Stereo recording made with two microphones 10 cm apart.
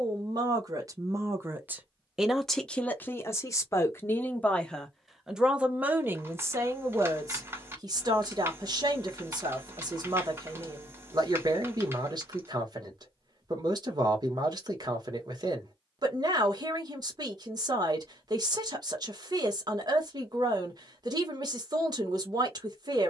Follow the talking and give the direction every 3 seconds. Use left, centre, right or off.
right, centre, right, right, right, right, right, right.